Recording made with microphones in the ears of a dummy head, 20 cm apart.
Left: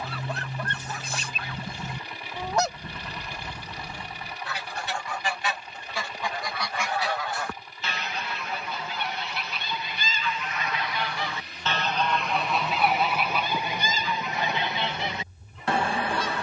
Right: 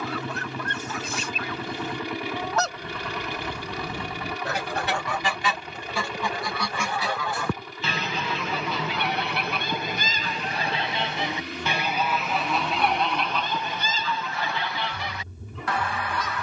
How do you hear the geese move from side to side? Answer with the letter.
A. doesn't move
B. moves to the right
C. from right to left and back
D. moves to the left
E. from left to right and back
E.